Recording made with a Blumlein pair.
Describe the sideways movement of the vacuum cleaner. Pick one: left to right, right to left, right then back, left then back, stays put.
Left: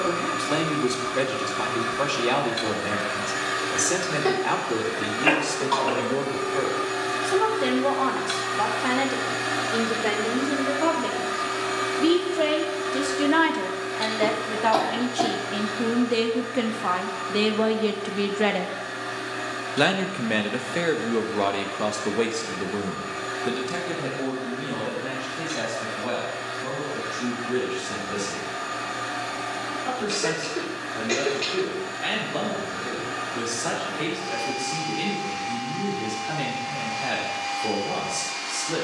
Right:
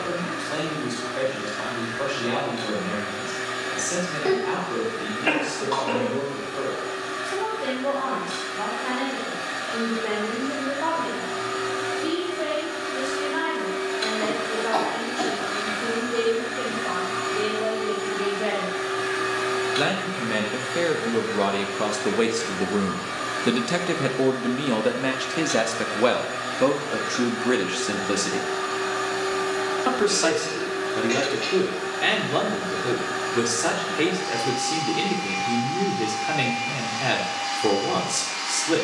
left to right.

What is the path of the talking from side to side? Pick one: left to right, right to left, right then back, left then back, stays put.
left to right.